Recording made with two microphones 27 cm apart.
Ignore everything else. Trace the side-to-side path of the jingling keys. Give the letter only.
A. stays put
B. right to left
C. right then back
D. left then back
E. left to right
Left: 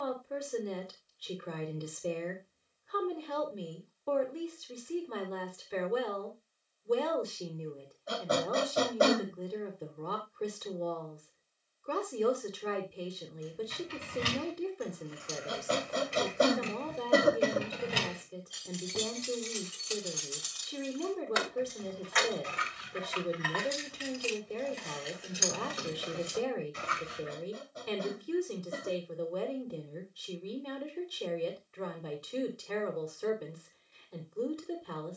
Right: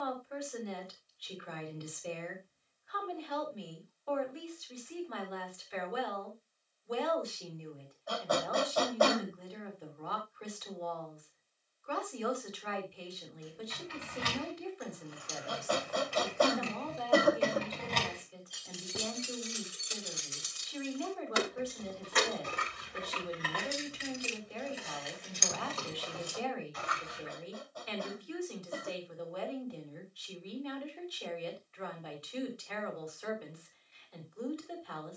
C.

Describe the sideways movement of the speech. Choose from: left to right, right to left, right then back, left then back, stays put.
stays put.